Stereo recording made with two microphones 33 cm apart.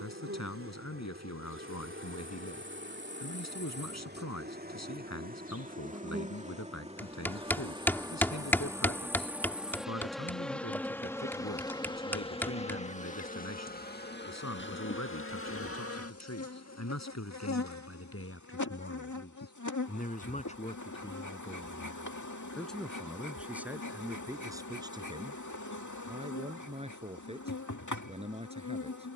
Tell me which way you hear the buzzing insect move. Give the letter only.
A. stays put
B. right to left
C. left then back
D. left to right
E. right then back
B.